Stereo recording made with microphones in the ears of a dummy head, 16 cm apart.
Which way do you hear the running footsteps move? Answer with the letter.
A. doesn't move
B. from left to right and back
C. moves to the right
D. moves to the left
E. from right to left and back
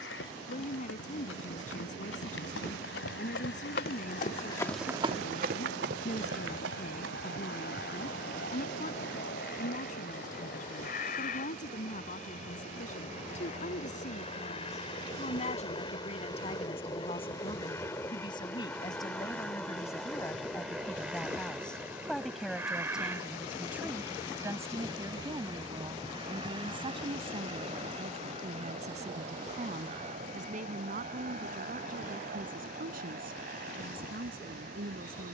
C.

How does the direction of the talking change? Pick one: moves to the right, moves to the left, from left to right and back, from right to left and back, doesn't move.
moves to the right.